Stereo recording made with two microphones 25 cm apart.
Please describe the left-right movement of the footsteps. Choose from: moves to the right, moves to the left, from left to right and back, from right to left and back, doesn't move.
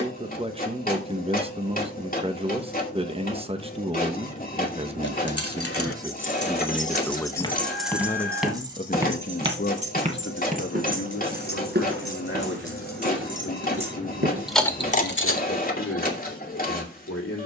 moves to the right.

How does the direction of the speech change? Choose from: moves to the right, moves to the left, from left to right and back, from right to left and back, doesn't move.
moves to the left.